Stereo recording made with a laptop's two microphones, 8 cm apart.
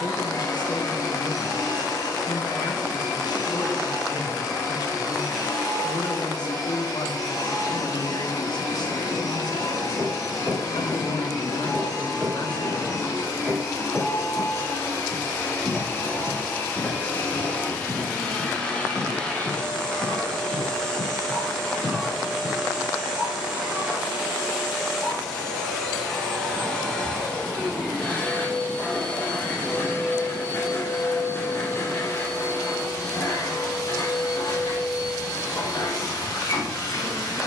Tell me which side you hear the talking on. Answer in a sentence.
In this clip you hear the talking on the left.